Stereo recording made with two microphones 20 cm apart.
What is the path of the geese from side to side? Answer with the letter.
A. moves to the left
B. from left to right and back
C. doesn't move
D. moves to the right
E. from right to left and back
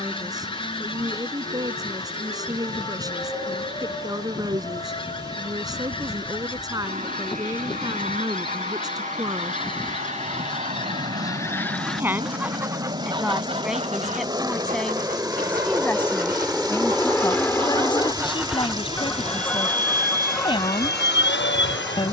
B.